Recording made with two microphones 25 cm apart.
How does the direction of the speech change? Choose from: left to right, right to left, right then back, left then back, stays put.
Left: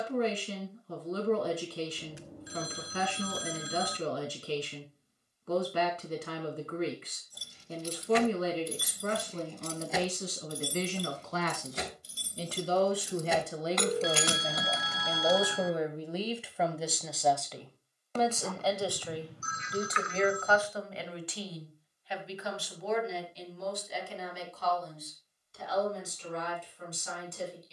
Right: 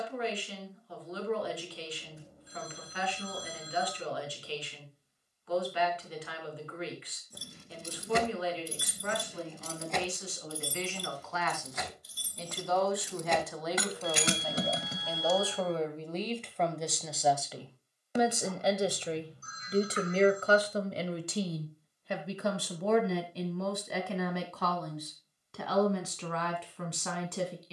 left to right.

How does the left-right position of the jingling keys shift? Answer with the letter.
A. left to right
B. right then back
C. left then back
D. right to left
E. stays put
C.